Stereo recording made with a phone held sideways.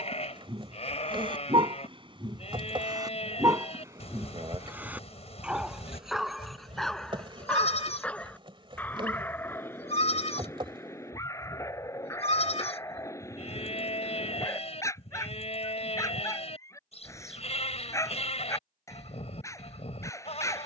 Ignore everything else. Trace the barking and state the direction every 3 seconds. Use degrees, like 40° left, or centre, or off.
30° right, 10° right, centre, 20° left, 20° left, 20° left, 20° left.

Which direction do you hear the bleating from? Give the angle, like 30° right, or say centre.
40° left.